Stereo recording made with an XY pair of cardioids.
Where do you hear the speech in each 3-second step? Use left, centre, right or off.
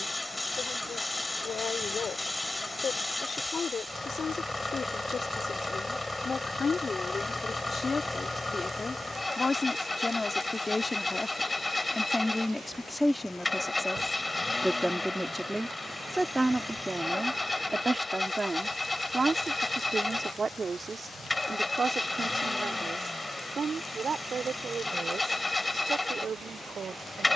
left, left, left, left, centre, centre, right, right, right.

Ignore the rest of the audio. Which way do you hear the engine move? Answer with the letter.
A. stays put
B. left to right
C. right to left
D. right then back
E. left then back
A.